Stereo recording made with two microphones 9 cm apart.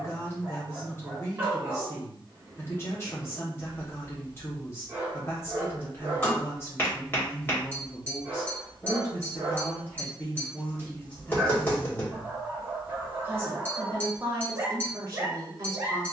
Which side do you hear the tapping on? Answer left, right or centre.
left.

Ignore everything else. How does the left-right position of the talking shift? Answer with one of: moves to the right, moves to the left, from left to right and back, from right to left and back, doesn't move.
moves to the right.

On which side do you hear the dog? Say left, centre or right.
right.